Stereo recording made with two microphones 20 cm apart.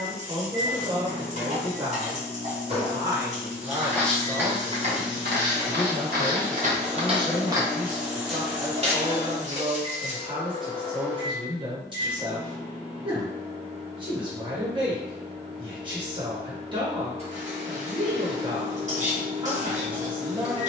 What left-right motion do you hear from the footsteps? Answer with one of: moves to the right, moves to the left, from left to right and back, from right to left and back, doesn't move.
from left to right and back.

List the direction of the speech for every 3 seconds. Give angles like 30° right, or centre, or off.
30° right, 10° right, centre, 30° right, 30° right, 30° right, 30° right.